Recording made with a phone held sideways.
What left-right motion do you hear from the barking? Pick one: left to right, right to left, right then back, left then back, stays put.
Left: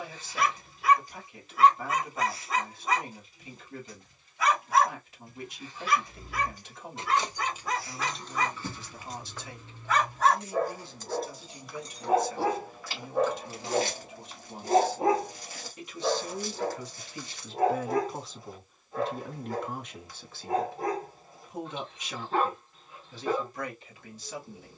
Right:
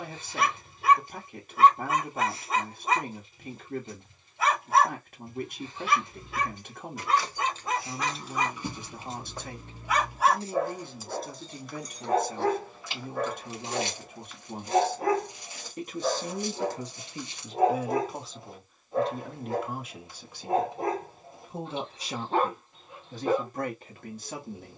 left then back.